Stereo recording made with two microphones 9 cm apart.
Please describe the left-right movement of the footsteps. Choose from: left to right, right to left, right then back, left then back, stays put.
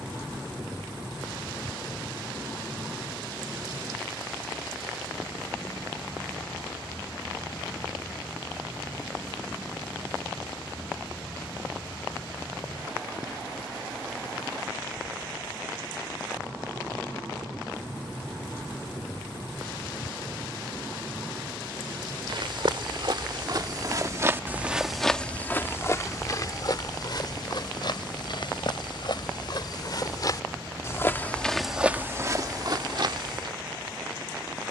left then back.